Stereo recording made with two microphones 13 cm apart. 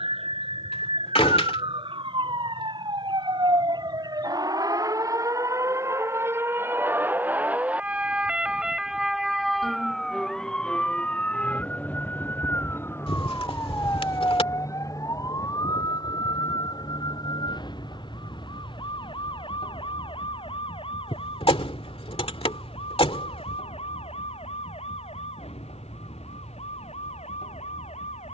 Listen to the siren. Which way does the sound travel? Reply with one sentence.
You can hear the siren move to the left.